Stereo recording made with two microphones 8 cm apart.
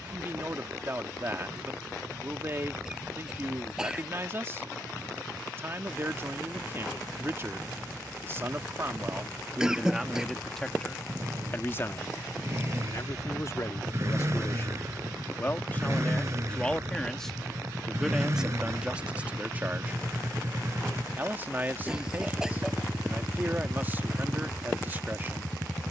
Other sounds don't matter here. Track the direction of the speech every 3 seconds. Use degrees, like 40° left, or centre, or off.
30° right, 30° right, 30° right, centre, 40° left, 20° left, 20° right, 30° right, 30° right.